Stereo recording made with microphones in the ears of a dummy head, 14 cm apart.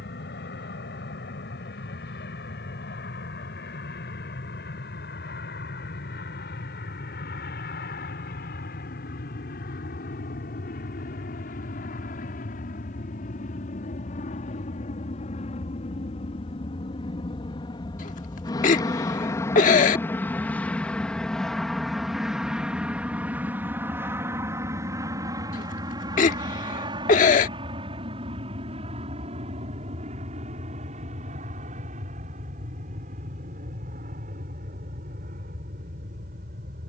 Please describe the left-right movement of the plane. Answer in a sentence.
You can hear the plane move to the right.